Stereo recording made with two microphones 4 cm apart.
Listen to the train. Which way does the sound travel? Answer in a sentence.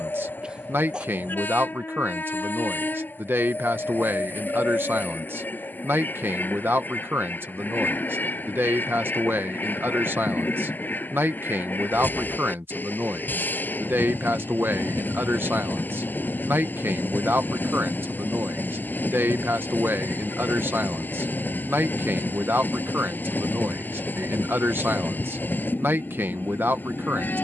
In this clip you hear the train stay in one place.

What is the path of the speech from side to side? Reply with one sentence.
In this clip you hear the speech stay put.